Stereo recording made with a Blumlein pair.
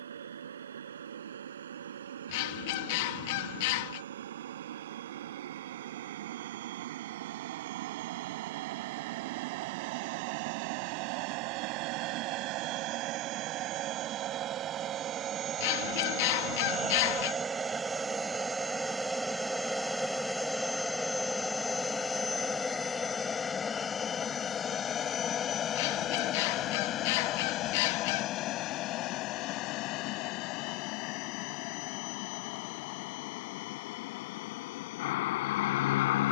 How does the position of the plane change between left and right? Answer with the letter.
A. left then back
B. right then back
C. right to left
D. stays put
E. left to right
C.